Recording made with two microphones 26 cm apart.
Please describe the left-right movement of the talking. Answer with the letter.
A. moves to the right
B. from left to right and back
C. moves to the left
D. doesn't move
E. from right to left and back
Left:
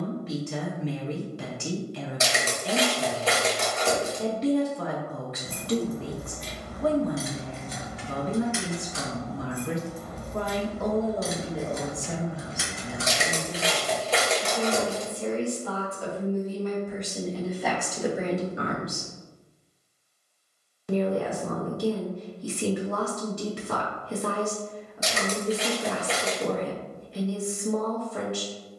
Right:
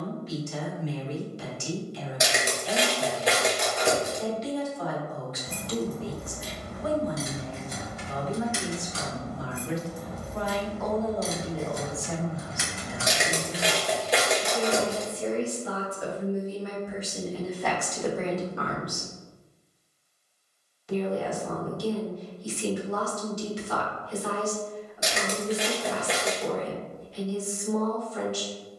B.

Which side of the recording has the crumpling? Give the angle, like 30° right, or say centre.
10° right.